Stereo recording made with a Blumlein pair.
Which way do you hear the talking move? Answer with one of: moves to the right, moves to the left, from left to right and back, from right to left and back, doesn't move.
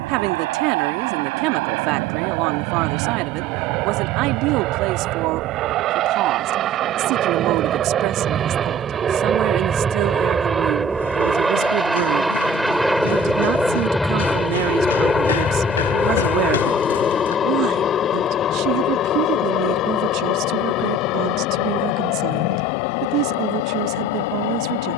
doesn't move.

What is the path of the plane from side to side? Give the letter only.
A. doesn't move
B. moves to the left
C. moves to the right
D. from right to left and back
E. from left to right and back
B.